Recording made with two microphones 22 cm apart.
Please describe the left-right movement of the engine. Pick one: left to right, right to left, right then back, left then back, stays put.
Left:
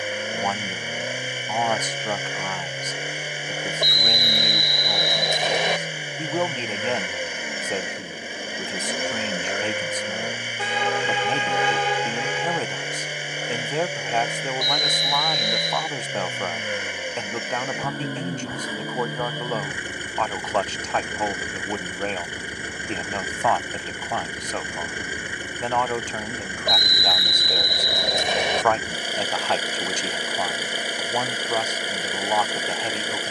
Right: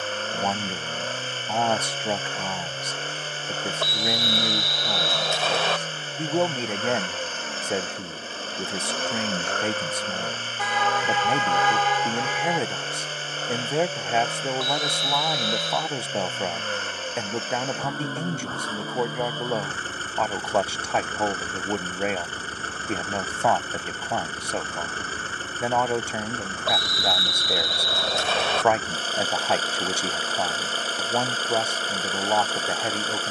stays put.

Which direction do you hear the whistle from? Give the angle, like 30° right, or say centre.
20° left.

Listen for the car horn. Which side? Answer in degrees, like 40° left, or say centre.
30° left.